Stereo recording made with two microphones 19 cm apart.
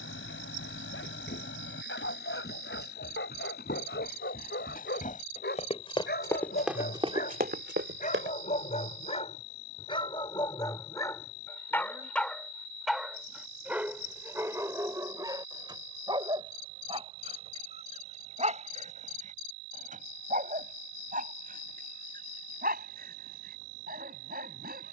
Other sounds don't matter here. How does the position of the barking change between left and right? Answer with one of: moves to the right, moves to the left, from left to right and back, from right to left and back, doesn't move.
moves to the right.